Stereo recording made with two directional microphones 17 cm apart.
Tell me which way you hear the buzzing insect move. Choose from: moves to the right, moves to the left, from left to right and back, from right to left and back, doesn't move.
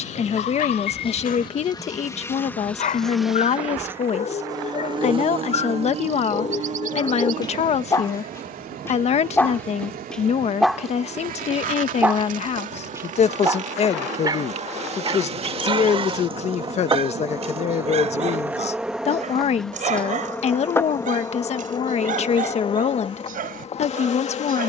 from left to right and back.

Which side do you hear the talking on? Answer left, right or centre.
left.